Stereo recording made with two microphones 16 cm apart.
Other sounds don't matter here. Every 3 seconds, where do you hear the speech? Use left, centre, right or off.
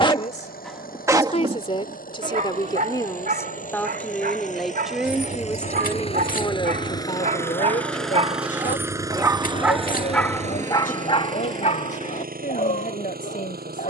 left, centre, left, left, left.